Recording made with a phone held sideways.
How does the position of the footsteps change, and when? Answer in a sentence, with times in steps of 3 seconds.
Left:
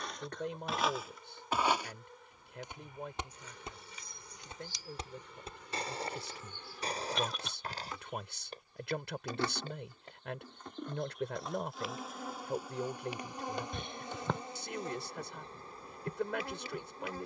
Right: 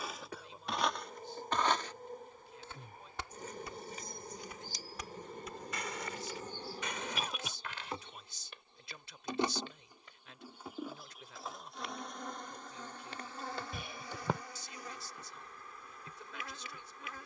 In this clip you hear the footsteps in the centre from 0 s, on the left from 3 s and not at all from 12 s.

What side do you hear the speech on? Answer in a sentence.
In this clip you hear the speech on the left.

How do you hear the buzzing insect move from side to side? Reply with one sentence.
You can hear the buzzing insect move to the left.